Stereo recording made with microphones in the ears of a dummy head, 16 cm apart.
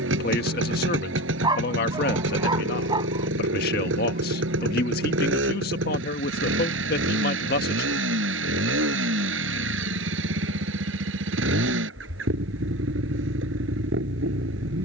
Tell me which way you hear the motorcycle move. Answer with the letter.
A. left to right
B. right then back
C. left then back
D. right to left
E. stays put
E.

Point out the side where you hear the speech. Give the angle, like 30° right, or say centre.
50° left.